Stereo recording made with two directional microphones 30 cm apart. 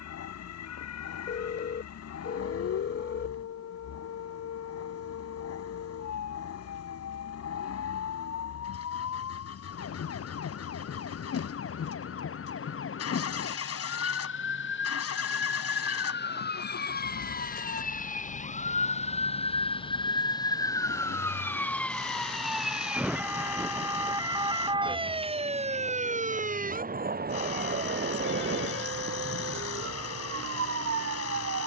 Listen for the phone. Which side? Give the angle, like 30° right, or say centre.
40° left.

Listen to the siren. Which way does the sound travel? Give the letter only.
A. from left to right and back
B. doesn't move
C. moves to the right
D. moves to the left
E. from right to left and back
C.